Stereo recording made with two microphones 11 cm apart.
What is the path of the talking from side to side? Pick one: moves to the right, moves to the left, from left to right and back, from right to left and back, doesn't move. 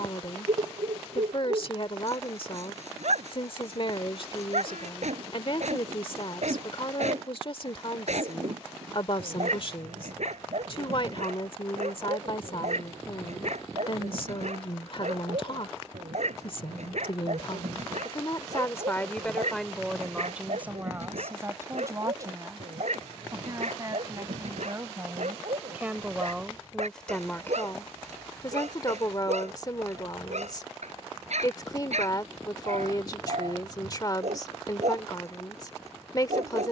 from left to right and back.